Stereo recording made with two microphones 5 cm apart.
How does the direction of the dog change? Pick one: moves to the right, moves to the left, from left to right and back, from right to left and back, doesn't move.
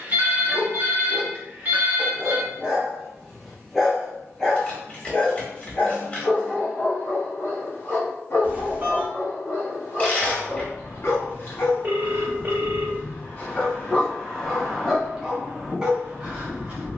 from right to left and back.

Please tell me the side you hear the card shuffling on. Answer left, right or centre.
left.